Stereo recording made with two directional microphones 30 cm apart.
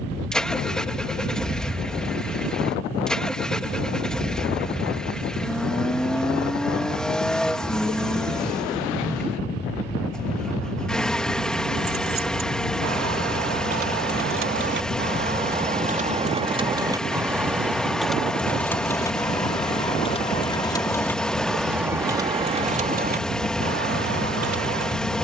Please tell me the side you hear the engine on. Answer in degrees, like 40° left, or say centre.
centre.